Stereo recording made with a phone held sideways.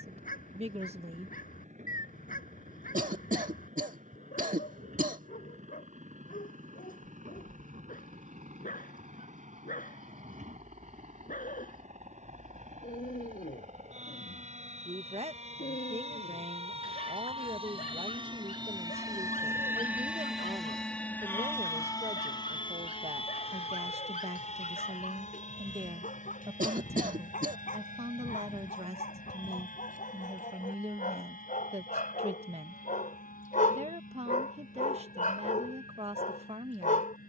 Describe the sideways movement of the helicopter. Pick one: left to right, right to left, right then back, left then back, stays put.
right to left.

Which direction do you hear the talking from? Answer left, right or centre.
right.